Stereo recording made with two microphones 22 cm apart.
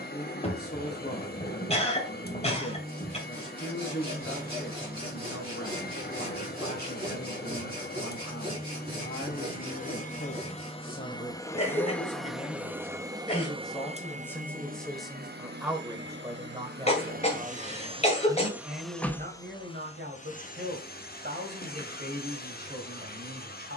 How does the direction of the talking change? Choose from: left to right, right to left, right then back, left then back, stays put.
left to right.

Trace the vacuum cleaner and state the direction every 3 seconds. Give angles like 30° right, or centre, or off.
40° left, 40° left, 40° left, 30° left, 20° right, 40° right, 20° left, 40° left.